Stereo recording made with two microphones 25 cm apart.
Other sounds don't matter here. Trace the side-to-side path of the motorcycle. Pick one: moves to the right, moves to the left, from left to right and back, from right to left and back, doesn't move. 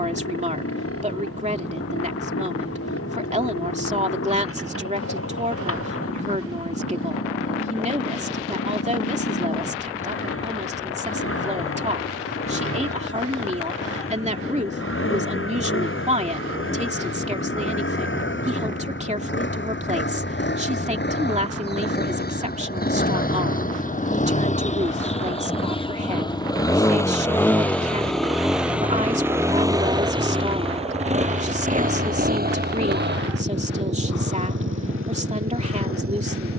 moves to the right.